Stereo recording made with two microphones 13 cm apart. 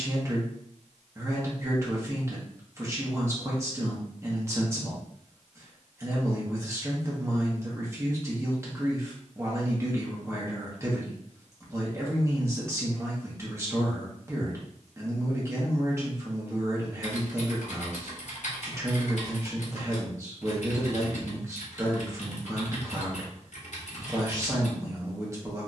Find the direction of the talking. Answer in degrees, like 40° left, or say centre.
20° right.